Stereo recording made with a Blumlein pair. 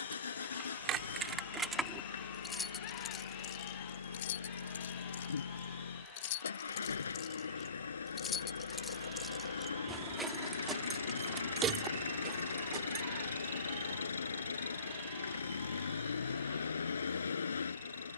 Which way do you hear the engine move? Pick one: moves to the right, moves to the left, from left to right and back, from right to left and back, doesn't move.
doesn't move.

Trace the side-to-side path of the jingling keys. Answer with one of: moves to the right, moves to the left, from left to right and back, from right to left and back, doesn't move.
from right to left and back.